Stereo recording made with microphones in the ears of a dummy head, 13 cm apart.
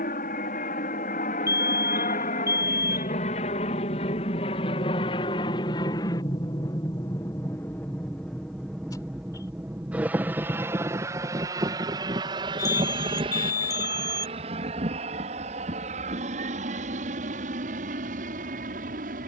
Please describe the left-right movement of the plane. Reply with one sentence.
In this clip you hear the plane move from left to right.